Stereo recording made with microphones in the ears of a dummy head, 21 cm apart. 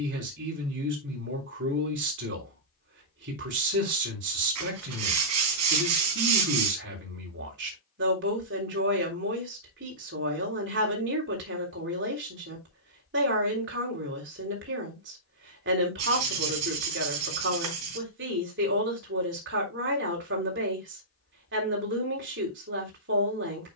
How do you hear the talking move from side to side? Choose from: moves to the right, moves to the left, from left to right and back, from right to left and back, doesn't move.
doesn't move.